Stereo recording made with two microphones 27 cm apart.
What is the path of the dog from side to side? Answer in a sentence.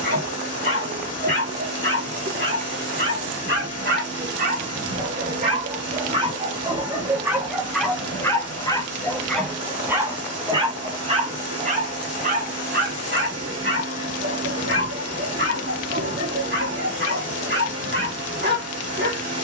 You can hear the dog go left and come back.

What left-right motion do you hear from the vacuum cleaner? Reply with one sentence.
In this clip you hear the vacuum cleaner stay in one place.